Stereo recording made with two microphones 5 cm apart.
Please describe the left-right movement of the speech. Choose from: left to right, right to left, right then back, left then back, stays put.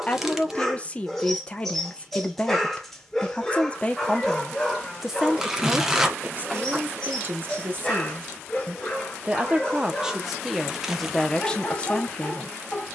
right then back.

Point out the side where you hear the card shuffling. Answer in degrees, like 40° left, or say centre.
10° right.